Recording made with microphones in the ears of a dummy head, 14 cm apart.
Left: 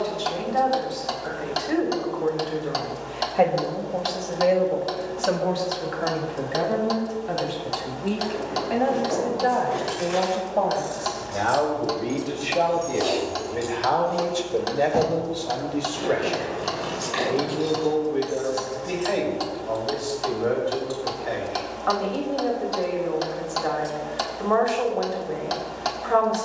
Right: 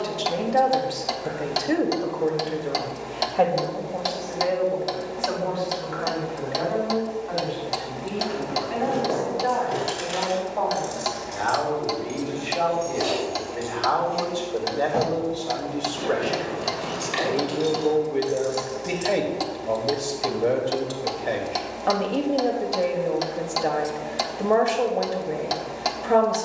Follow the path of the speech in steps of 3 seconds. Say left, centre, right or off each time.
right, left, left, left, left, centre, right, right, right.